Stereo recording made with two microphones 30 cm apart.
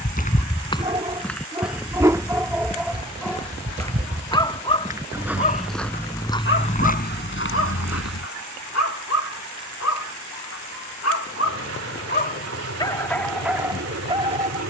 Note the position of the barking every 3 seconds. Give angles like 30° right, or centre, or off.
10° right, 20° left, 50° left, 60° left, centre.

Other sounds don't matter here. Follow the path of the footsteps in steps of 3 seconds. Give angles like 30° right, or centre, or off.
centre, 10° right, 30° left, off, off.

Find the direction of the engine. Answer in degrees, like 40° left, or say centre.
50° right.